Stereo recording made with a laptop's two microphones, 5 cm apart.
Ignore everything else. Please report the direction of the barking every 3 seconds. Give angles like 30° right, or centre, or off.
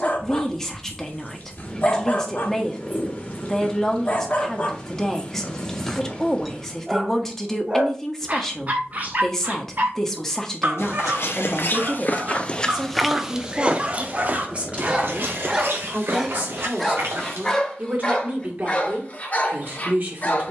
40° left, 30° left, 20° right, 40° right, 30° right, centre, 30° left.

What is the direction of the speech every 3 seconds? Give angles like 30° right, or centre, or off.
10° left, 10° left, 10° left, 10° left, 20° right, 30° right, 40° right.